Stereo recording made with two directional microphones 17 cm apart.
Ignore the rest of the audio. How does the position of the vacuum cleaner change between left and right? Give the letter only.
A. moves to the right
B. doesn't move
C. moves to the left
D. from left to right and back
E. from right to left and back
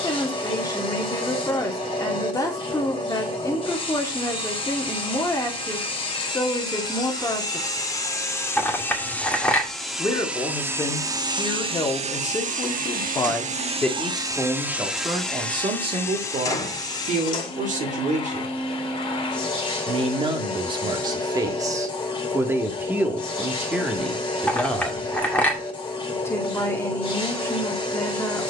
D.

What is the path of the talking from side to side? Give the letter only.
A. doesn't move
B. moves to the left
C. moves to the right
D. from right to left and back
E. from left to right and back
E.